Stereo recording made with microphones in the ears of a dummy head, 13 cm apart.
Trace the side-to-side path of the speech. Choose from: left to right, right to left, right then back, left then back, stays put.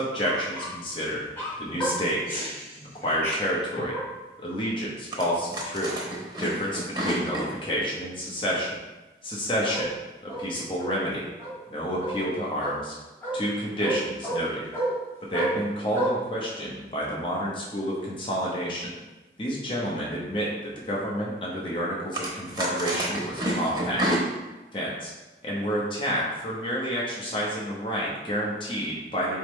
stays put.